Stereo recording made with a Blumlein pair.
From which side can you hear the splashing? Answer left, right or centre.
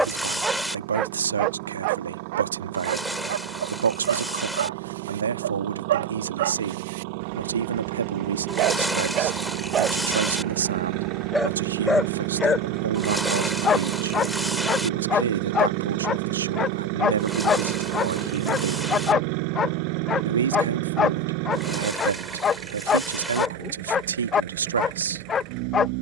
centre.